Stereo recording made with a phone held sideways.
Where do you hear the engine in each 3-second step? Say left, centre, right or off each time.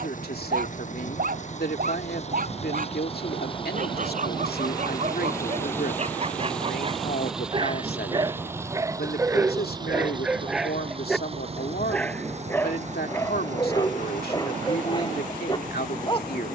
left, left, centre, right, right, right.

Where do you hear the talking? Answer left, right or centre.
left.